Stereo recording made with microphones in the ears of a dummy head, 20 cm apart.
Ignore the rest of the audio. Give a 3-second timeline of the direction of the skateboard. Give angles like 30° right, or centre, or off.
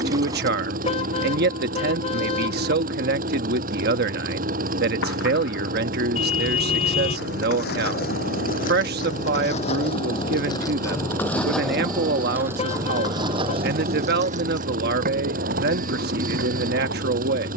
off, 60° left, 50° left, 20° left, 20° right, 50° right.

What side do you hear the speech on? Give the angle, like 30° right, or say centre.
50° right.